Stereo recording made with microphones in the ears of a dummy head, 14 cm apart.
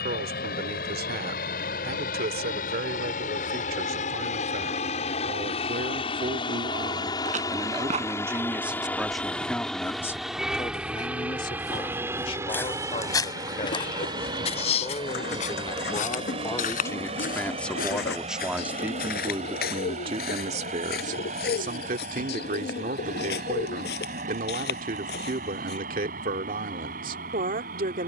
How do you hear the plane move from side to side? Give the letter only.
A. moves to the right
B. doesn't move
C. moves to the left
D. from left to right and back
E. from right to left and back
A.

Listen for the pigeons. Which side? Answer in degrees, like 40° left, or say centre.
70° left.